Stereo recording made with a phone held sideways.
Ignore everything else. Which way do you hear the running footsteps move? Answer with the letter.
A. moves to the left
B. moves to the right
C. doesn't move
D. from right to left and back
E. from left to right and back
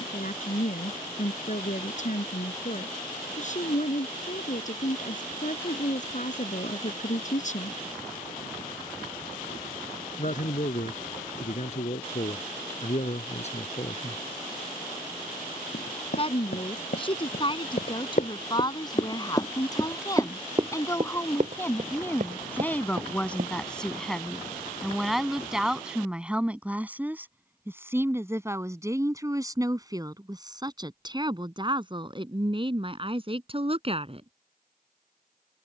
B.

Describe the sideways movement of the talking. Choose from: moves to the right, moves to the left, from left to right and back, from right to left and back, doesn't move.
moves to the right.